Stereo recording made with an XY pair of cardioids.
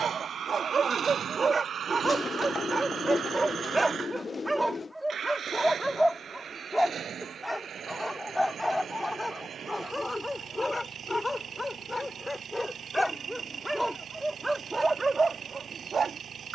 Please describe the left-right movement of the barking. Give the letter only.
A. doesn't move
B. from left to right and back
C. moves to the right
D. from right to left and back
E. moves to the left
D.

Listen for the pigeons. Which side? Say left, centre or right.
left.